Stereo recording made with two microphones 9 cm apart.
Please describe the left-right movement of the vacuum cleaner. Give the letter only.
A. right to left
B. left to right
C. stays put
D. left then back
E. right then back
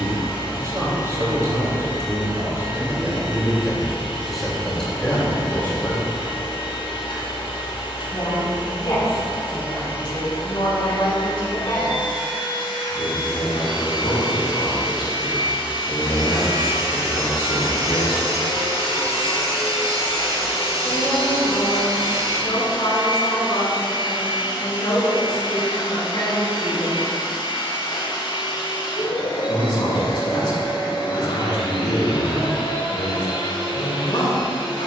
C.